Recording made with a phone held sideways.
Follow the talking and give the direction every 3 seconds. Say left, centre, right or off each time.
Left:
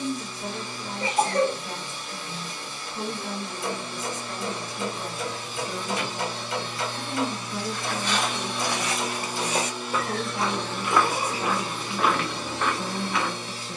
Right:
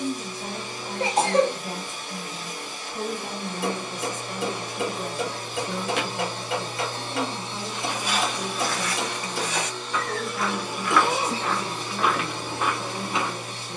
right, right, centre, left, left.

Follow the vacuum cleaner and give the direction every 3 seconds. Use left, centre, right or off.
right, right, right, centre, right.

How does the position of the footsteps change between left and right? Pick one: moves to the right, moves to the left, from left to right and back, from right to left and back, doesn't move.
from right to left and back.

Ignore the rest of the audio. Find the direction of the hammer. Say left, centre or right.
right.